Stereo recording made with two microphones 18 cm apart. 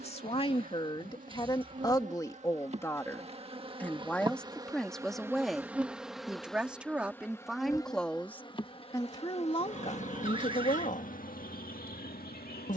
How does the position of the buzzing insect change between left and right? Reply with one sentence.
In this clip you hear the buzzing insect move from right to left.